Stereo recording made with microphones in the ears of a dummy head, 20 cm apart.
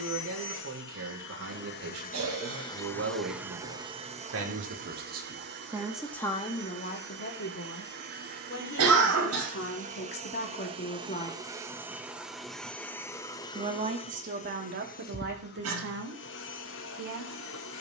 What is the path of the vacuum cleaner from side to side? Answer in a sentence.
In this clip you hear the vacuum cleaner move from left to right and back again.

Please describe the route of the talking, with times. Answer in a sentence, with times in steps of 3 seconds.
You can hear the talking on the right from 0 s, on the left from 6 s and on the right from 12 s.